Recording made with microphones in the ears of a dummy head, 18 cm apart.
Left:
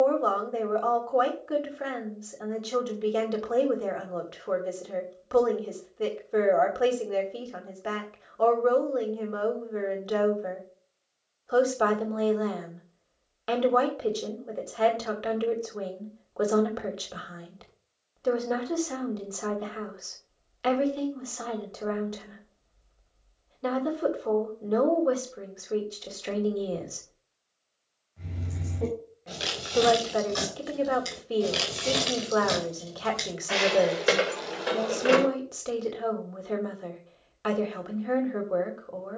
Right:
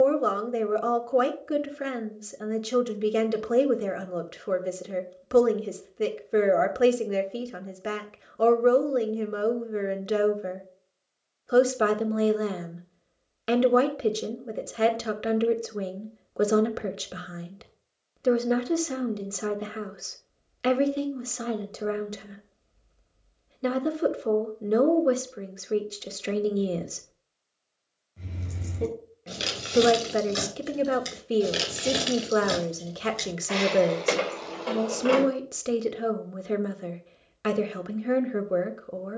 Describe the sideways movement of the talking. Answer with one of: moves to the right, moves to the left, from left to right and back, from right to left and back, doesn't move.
doesn't move.